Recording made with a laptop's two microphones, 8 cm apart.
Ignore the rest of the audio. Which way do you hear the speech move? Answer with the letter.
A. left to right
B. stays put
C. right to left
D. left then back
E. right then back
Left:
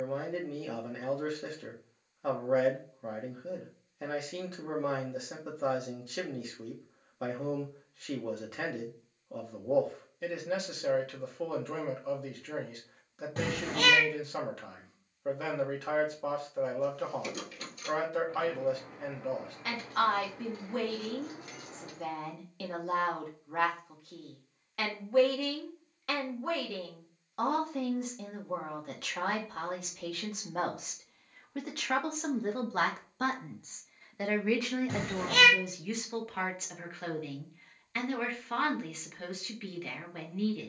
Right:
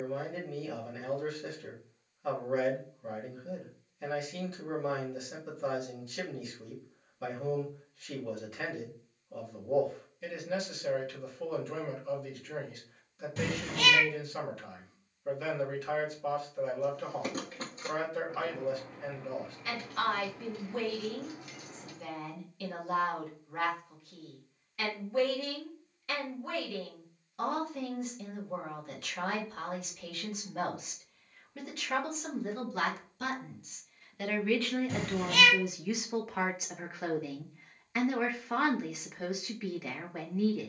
A.